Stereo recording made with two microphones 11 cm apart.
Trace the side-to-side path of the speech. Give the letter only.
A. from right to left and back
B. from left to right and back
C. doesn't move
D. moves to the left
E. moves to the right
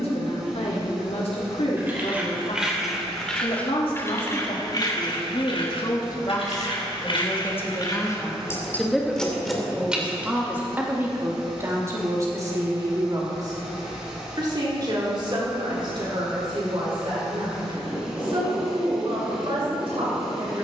E.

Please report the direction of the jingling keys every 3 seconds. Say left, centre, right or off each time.
centre, left, left, centre, off, off, off.